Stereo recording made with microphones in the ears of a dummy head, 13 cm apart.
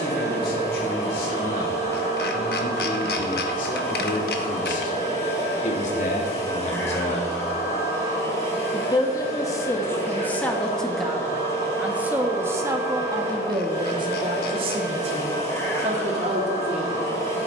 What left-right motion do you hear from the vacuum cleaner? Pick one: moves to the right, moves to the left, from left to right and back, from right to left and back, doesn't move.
doesn't move.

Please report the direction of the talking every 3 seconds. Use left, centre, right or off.
left, left, left, centre, right, right.